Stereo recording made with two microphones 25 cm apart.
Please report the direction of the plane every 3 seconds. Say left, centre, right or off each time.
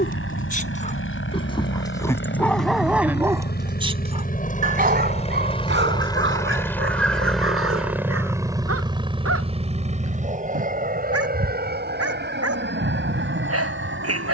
left, left, centre, right, right.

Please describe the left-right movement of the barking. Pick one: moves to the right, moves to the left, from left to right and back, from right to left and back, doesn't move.
moves to the right.